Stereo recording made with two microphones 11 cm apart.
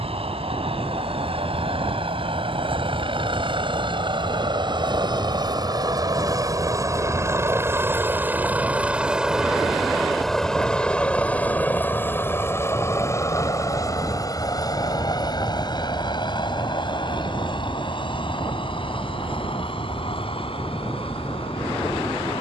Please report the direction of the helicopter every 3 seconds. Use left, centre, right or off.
right, right, right, centre, left, left, left, left.